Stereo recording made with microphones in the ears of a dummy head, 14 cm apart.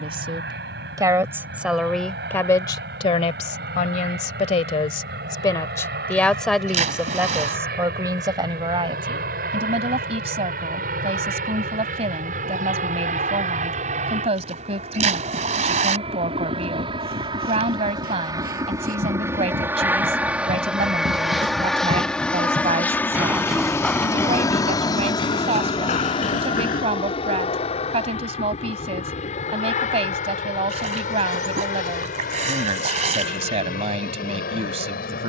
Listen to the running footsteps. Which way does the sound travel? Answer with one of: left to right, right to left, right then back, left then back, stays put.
right to left.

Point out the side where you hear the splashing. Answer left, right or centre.
right.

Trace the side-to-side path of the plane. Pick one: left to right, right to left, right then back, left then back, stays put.
right to left.